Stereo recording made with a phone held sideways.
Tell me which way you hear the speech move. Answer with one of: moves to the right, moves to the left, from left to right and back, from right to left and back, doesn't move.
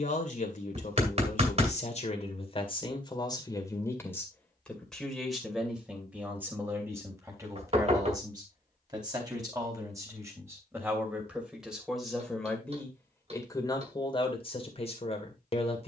from left to right and back.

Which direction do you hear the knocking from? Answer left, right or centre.
right.